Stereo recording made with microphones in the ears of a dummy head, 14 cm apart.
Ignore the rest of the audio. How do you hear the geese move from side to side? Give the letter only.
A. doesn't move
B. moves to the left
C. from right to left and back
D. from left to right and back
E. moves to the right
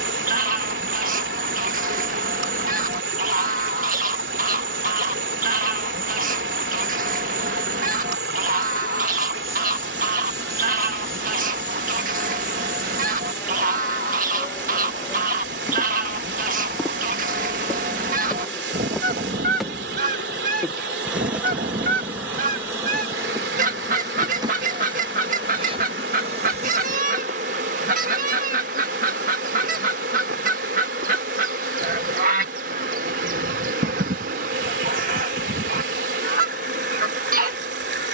A.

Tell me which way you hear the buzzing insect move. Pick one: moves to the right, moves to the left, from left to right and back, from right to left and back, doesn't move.
from right to left and back.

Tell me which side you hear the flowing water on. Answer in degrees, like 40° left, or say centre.
80° right.